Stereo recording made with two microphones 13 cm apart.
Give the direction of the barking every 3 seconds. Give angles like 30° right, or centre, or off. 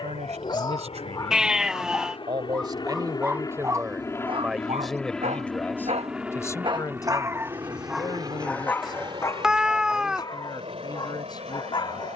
30° left, 40° right, 10° right, 30° left.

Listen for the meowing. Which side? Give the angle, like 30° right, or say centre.
centre.